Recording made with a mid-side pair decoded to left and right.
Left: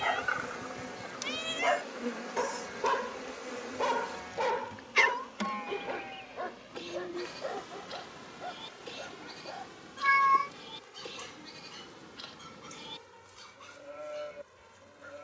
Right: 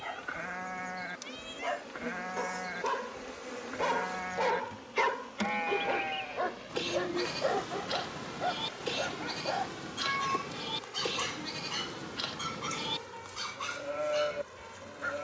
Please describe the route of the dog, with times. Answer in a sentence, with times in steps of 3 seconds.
In this clip you hear the dog on the left from 0 s, in the centre from 3 s and on the right from 6 s.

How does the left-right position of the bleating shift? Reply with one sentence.
You can hear the bleating stay in one place.